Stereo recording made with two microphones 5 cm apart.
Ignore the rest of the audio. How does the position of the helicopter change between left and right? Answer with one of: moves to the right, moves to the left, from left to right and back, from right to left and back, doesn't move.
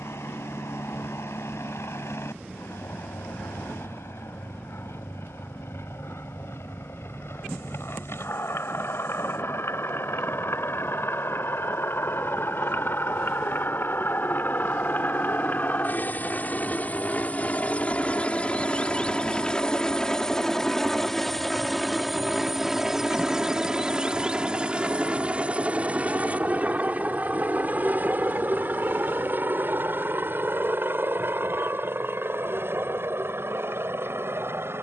moves to the right.